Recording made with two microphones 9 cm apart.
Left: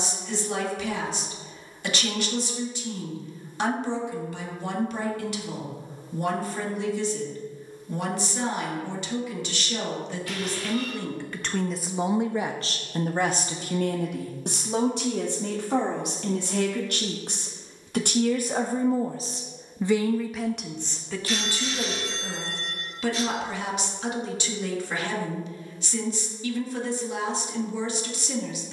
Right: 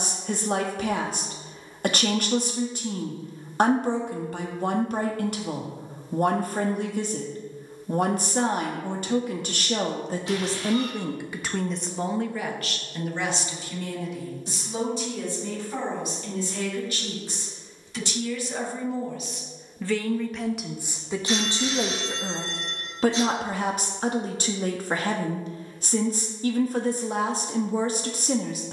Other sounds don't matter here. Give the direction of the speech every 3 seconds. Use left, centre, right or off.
right, right, right, right, left, left, left, right, right, right.